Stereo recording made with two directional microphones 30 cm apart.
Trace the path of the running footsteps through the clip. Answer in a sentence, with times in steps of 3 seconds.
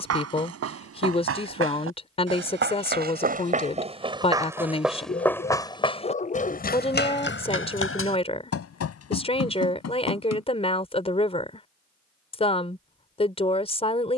You can hear the running footsteps on the right from 0 s, in the centre from 3 s, on the left from 6 s and not at all from 12 s.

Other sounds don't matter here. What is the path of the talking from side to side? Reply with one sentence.
In this clip you hear the talking stay put.